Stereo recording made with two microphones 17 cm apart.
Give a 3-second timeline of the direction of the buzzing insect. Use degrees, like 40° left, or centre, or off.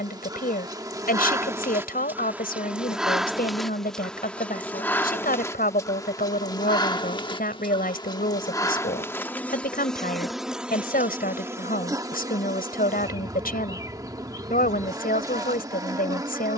20° right, 10° left, 20° left, centre, 20° right, 20° right.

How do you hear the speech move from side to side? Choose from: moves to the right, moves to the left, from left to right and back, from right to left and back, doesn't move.
doesn't move.